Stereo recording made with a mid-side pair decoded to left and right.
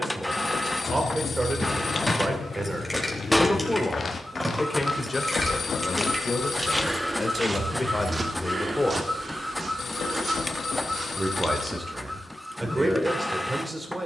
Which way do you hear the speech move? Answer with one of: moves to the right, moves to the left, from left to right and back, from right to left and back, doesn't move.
from right to left and back.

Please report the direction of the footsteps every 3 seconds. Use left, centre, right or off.
left, left, right, right, off.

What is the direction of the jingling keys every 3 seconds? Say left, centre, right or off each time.
left, centre, right, off, off.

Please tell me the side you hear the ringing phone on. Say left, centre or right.
left.